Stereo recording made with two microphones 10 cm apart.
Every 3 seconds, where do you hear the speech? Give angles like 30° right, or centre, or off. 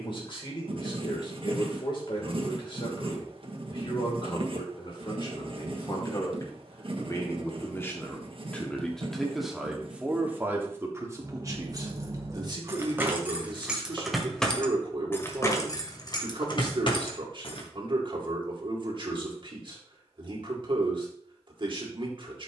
50° left, 50° left, 20° left, 20° right, 50° right, 50° right, 50° right, 50° right.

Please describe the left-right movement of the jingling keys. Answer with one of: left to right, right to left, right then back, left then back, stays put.
right to left.